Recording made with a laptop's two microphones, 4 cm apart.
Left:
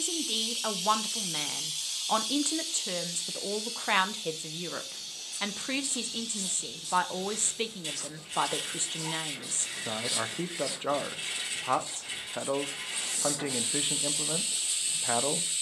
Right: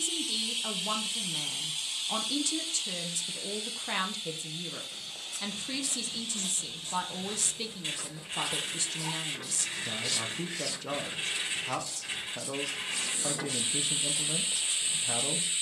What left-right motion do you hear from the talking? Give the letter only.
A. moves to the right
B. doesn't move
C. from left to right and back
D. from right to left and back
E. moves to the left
B.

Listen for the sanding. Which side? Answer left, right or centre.
right.